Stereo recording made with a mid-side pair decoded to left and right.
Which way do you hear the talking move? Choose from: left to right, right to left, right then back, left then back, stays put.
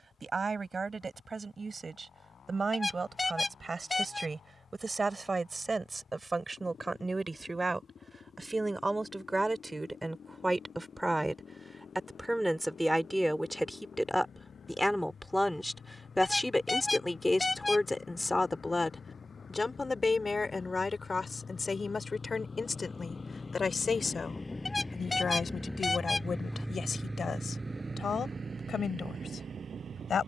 right to left.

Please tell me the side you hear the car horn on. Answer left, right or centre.
left.